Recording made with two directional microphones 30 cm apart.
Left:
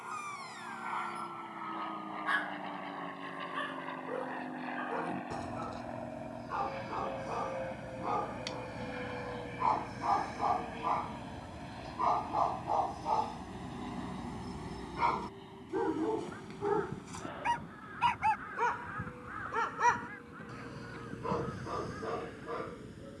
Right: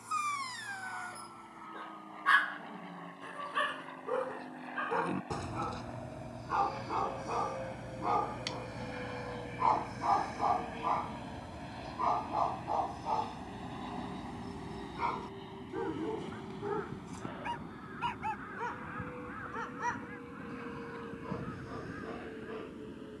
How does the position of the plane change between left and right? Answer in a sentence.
You can hear the plane move to the right.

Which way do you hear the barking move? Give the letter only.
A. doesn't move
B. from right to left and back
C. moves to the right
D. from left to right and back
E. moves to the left
E.